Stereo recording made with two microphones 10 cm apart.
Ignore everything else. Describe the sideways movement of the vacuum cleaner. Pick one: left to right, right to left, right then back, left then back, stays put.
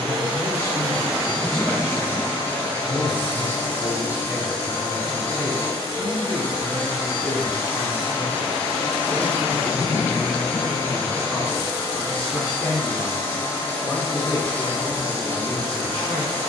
stays put.